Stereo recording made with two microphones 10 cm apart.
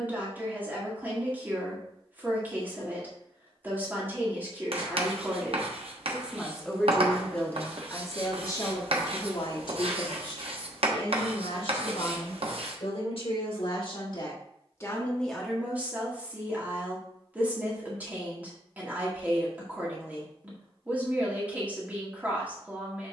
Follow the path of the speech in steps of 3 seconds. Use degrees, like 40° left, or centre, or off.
20° right, 20° right, 20° left, 60° left, 60° left, 10° right, 20° right, 20° right.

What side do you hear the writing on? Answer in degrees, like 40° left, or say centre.
70° right.